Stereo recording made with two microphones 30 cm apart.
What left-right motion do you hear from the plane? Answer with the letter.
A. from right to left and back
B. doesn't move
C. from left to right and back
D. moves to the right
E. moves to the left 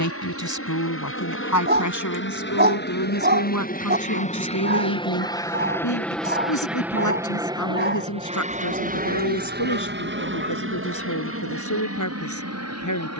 D.